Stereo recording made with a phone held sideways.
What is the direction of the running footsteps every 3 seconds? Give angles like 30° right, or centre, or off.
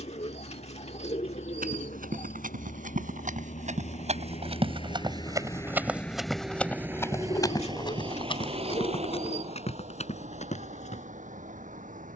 70° right, 40° right, 20° left, 50° left.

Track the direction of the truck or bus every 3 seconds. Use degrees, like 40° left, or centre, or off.
70° left, 40° left, 20° right, 60° right.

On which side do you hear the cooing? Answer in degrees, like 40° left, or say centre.
50° left.